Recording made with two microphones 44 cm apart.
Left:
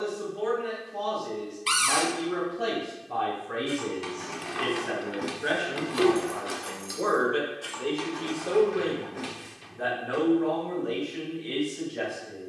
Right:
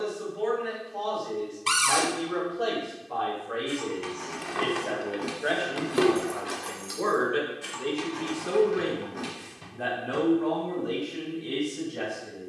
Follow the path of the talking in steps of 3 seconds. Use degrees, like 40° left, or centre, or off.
50° left, 30° left, 10° right, 50° right.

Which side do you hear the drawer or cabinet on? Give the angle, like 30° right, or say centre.
70° right.